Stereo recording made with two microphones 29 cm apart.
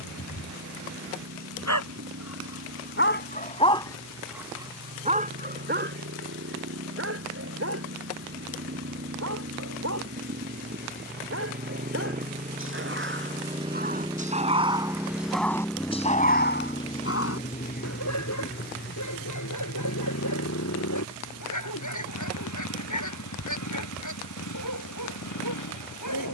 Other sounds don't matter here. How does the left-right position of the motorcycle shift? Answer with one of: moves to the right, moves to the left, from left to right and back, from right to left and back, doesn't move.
moves to the left.